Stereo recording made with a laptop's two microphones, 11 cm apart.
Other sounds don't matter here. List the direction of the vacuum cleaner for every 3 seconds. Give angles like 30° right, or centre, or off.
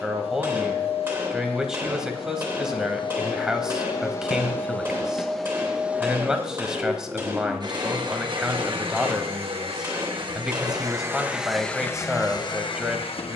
60° left, 20° left, 40° right, 30° right, 50° left.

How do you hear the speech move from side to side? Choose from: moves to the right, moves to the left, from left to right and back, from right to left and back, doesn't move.
doesn't move.